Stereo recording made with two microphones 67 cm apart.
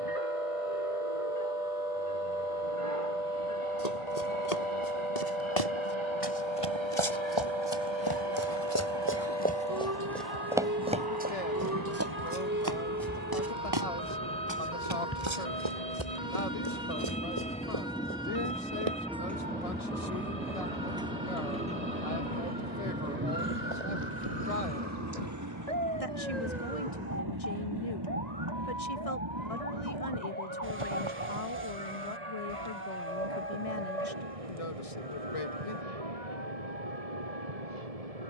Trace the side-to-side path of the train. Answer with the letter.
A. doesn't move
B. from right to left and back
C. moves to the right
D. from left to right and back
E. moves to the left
C.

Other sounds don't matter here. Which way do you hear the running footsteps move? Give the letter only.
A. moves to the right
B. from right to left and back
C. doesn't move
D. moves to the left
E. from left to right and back
A.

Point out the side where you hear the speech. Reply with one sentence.
You can hear the speech on the left.